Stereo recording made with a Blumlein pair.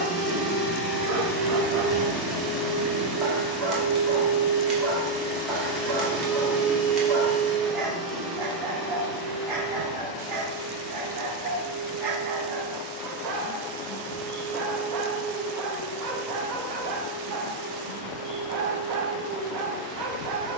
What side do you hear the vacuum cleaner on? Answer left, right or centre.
right.